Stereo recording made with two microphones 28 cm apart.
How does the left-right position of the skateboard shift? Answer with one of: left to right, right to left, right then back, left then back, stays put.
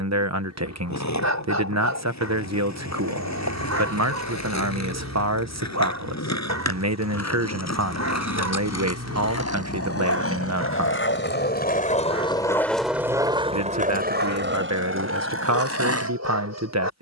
left to right.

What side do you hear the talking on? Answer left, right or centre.
right.